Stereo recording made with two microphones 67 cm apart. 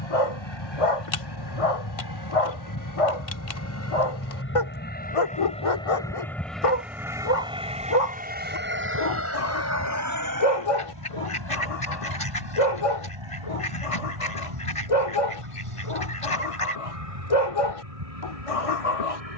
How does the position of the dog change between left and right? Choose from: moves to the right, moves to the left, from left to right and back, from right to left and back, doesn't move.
doesn't move.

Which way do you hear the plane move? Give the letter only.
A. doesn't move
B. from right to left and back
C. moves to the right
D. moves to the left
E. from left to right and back
C.